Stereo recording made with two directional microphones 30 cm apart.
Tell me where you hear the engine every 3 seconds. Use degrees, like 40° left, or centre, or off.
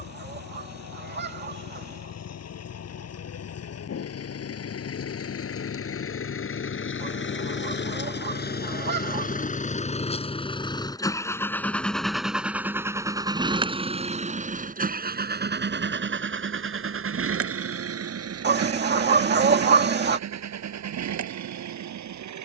60° left, 50° left, 40° left, 20° left, 10° right, 40° right, 60° right, 70° right.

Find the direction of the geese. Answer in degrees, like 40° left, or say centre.
30° right.